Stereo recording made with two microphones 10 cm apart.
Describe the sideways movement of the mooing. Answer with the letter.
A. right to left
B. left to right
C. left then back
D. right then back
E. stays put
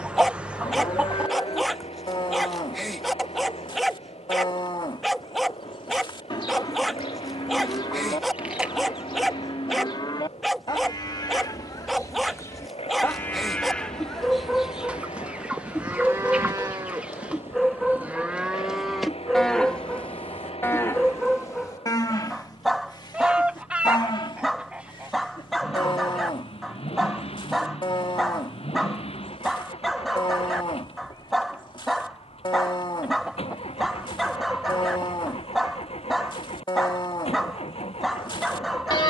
D.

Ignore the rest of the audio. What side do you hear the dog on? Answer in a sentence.
You can hear the dog in the centre.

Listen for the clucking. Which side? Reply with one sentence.
You can hear the clucking in the centre.